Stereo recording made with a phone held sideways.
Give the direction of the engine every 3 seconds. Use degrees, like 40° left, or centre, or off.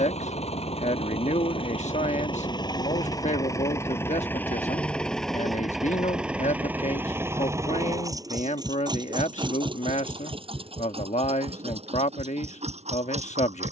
40° left, 10° left, 20° right, 40° right, 50° right.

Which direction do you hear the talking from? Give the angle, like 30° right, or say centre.
50° left.